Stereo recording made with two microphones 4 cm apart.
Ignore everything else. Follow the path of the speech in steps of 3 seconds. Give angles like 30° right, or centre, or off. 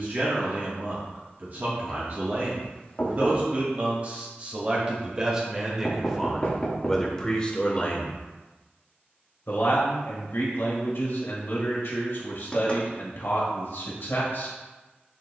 50° right, 30° right, 20° left, 60° left, 70° left.